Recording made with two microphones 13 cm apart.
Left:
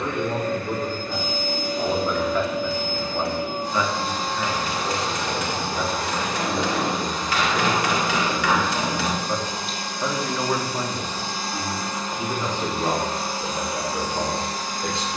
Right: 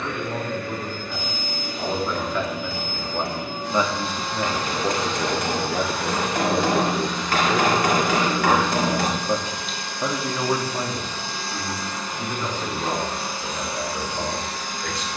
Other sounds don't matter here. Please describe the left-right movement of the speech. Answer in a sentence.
In this clip you hear the speech go right and come back.